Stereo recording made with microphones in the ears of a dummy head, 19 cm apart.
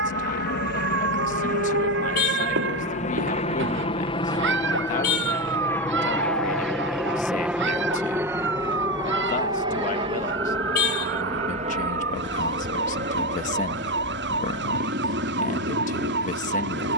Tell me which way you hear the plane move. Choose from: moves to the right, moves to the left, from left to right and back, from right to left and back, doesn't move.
moves to the right.